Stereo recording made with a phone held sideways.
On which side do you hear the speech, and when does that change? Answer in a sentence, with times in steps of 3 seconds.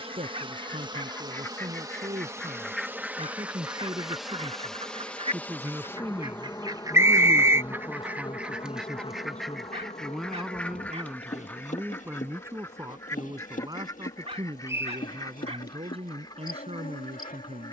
You can hear the speech on the right from 0 s, in the centre from 6 s and on the right from 12 s.